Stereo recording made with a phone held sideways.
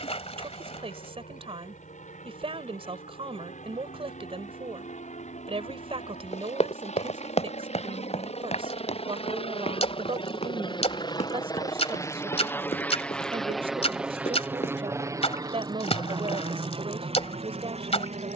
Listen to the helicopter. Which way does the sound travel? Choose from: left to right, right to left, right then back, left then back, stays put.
left to right.